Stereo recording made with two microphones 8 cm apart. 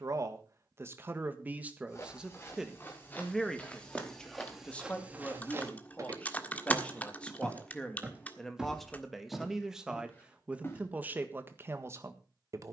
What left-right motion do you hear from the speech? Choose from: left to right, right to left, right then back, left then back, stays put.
left then back.